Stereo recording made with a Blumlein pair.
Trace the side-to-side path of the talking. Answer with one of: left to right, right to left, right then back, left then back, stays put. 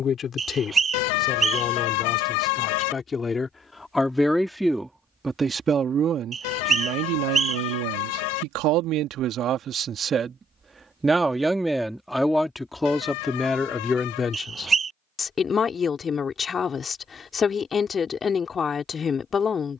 right then back.